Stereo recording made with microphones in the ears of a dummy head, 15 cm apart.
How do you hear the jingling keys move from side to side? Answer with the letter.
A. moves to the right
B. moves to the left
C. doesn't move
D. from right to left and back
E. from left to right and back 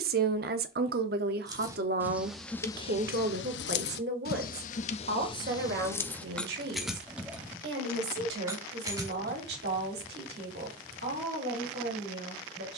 D.